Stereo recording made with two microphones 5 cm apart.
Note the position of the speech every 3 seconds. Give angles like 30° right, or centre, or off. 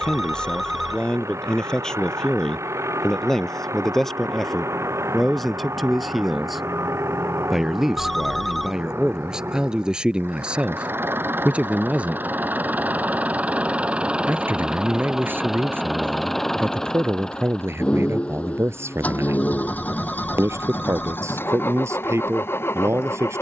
10° left, centre, 10° right, 20° right, 40° right, 50° right, 60° right, 70° right.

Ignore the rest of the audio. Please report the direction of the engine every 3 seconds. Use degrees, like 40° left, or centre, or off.
80° right, 70° right, 70° right, 50° right, 30° right, centre, 30° left, 50° left.